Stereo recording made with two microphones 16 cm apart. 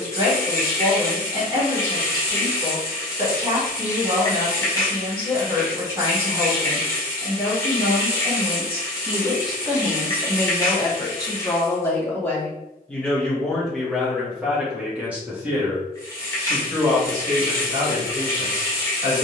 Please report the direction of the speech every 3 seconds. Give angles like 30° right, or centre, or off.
20° right, 20° right, 20° right, 10° left, centre, 20° right, 20° right.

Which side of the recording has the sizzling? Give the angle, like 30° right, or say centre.
20° left.